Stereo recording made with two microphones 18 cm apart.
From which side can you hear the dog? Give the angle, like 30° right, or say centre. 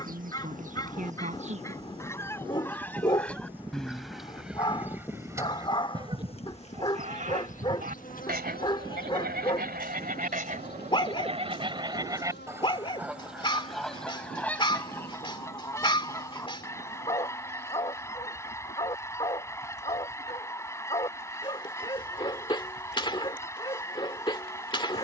30° left.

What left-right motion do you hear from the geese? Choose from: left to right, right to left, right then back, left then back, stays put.
right then back.